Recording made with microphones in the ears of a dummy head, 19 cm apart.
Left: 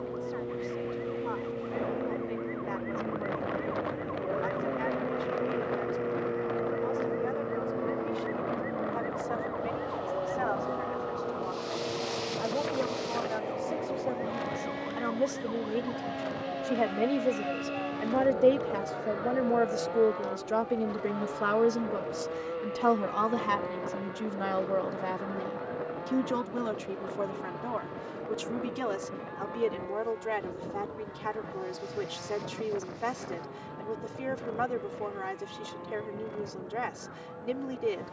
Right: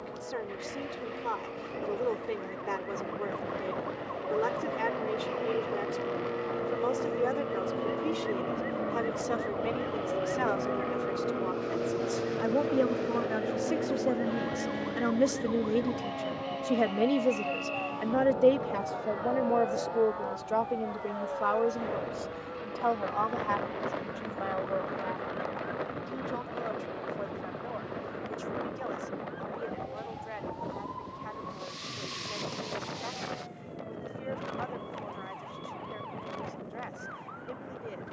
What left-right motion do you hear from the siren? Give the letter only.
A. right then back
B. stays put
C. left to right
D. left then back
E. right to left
C.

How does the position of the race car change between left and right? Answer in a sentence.
In this clip you hear the race car travel towards the left.